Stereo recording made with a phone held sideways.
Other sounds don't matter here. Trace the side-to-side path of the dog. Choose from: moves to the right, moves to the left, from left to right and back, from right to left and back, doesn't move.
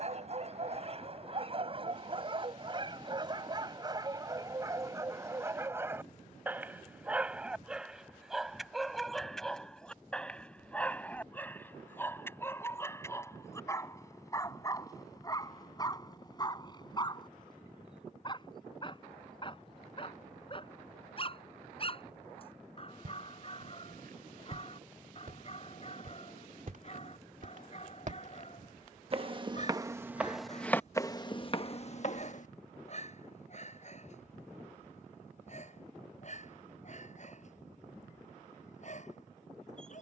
moves to the left.